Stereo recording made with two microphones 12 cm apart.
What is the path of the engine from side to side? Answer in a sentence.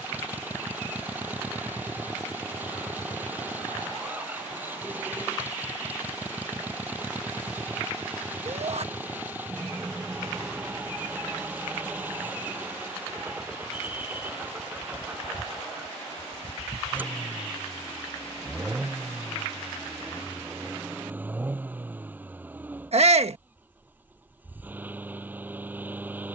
You can hear the engine stay in one place.